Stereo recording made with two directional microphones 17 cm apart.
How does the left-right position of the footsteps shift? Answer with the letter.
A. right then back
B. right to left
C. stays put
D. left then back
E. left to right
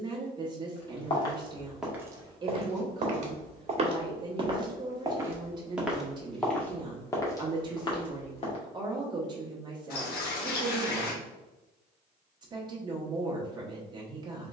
A.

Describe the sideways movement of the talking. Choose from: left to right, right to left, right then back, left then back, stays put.
stays put.